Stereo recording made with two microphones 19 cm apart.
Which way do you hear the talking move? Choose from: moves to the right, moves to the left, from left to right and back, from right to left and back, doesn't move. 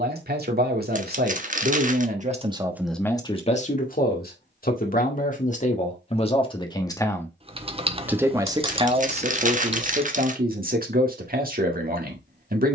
from right to left and back.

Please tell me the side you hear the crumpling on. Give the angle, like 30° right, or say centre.
40° right.